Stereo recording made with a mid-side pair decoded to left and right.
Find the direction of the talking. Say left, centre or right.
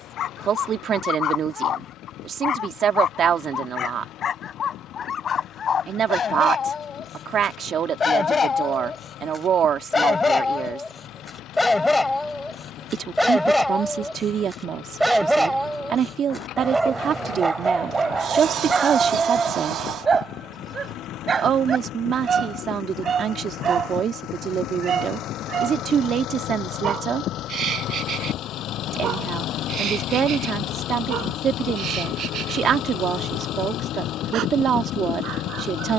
right.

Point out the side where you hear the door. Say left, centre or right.
right.